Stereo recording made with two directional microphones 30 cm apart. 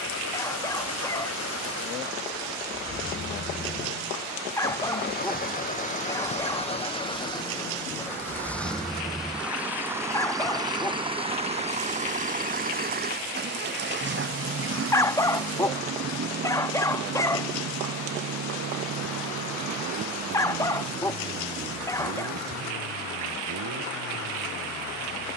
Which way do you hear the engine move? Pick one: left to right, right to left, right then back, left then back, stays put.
left to right.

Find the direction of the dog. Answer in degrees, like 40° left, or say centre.
10° left.